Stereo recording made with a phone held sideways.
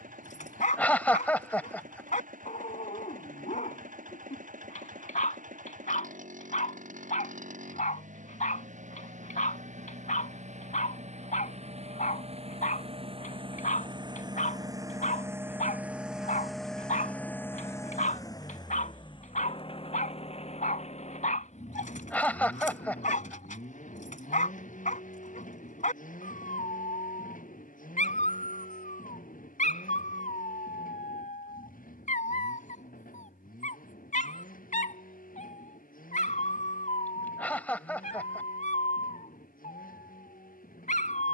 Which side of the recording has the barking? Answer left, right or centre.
left.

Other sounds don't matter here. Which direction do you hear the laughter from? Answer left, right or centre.
centre.